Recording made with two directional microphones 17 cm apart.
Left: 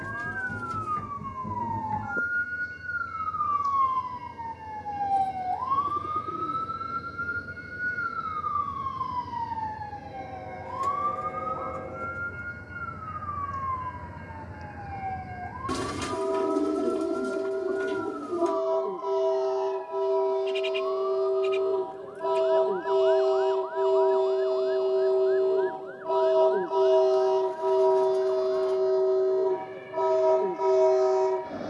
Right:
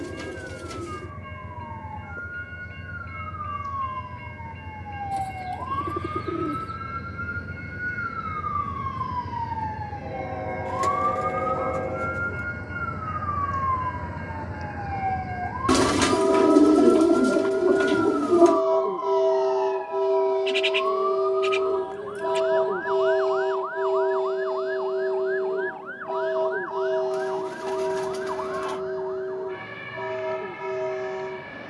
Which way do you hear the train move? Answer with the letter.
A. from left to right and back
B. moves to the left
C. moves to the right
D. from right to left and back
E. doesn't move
B.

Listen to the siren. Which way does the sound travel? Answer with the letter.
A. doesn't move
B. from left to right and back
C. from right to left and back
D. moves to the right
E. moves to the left
D.